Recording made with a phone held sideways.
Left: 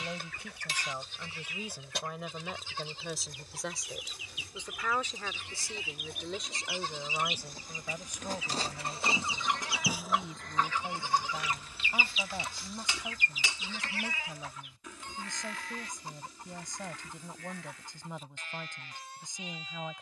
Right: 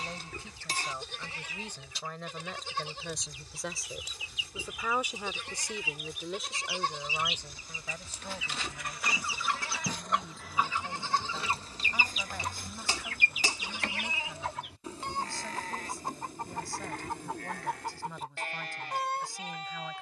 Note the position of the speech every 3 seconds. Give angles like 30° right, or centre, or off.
10° left, 10° right, 10° left, 20° left, 20° left, 20° left, 20° left.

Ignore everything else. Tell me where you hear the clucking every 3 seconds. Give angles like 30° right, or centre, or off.
70° left, 60° left, 50° left, 10° right, 60° right, 80° right, 80° right.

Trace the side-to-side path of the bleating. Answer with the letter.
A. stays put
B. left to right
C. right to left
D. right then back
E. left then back
E.